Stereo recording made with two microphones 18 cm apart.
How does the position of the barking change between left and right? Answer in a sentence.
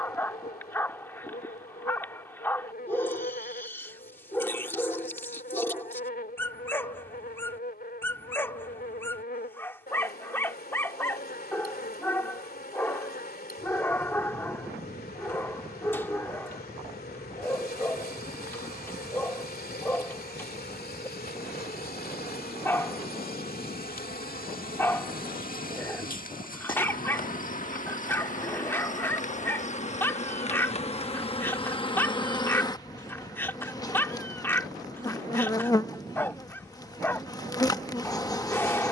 You can hear the barking stay in one place.